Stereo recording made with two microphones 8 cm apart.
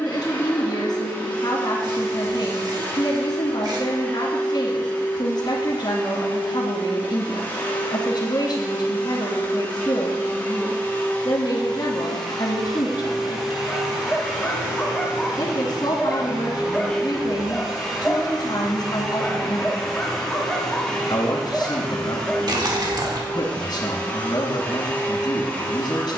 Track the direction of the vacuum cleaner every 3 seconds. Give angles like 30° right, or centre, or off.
20° left, 20° left, 20° left, 20° left, centre, 10° right, centre, 10° left, 20° left.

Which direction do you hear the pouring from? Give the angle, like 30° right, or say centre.
50° right.